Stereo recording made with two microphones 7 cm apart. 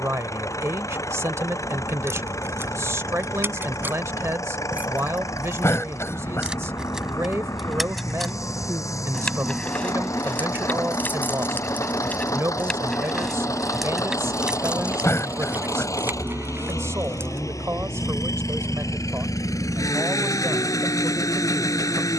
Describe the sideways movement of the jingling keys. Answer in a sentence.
In this clip you hear the jingling keys go left and come back.